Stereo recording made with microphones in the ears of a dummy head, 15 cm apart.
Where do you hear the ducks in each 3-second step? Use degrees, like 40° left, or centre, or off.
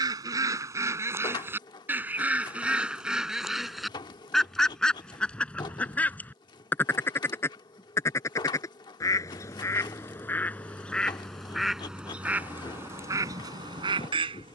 10° right, centre, 10° left, 10° left, 20° right.